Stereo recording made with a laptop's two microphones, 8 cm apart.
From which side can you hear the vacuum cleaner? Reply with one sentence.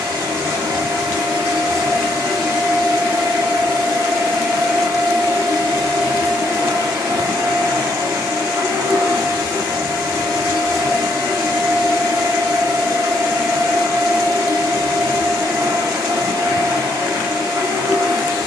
In this clip you hear the vacuum cleaner on the right.